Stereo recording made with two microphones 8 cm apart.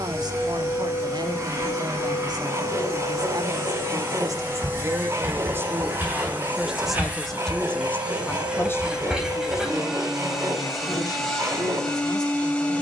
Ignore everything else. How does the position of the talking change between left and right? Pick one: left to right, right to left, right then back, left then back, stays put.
right to left.